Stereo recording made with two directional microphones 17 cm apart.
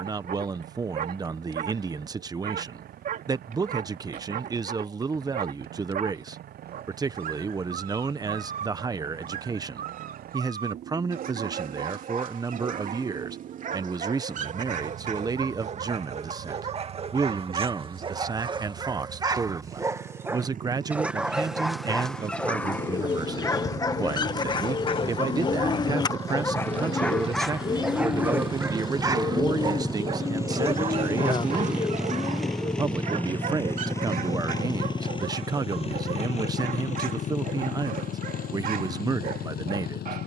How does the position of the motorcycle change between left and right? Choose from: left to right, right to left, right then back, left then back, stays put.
right to left.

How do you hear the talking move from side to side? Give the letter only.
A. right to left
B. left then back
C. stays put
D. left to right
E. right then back
C.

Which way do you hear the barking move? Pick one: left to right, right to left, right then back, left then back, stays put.
left then back.